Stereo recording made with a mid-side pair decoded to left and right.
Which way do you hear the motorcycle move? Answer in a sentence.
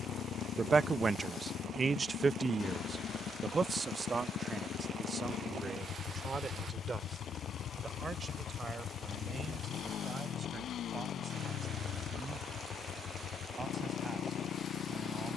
In this clip you hear the motorcycle stay put.